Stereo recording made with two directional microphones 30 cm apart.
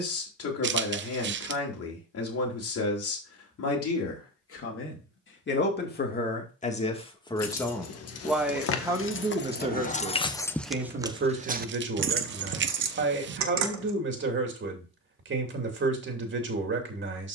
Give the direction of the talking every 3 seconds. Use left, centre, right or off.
left, left, centre, right, right, right.